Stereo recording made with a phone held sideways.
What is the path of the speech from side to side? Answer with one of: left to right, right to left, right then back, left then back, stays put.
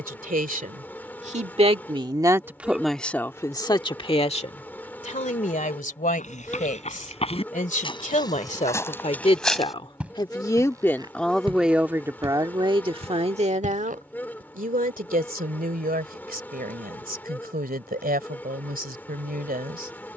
left then back.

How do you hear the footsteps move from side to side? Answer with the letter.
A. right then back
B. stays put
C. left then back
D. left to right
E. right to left
D.